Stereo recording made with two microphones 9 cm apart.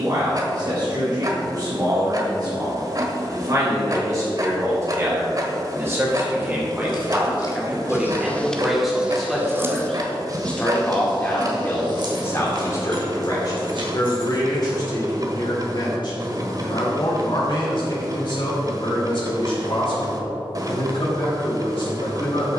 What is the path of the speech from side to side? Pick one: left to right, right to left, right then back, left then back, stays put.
right to left.